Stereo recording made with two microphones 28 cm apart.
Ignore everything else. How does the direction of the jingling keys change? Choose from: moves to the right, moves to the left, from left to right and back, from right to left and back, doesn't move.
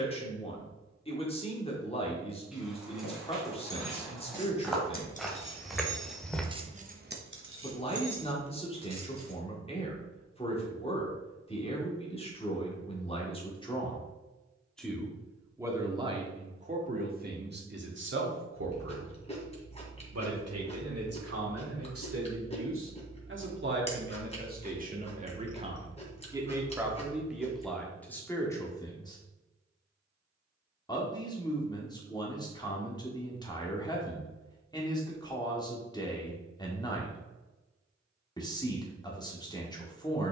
moves to the right.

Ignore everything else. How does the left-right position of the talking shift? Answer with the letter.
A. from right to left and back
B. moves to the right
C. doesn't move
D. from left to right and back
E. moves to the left
D.